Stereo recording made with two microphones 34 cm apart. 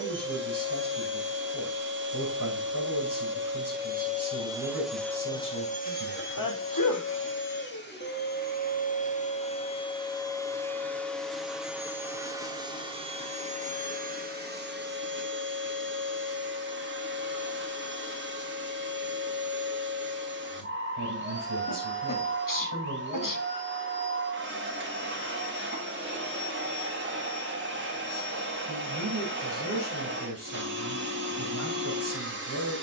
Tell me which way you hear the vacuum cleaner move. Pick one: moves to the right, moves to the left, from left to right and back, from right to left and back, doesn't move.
from right to left and back.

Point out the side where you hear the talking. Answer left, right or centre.
right.